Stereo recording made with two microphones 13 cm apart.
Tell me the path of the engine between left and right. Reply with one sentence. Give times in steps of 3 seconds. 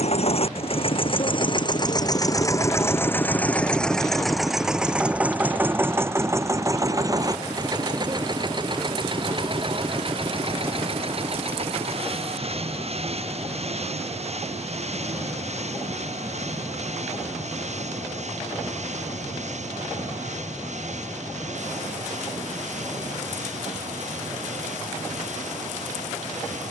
In this clip you hear the engine on the left from 0 s, in the centre from 3 s and on the right from 6 s.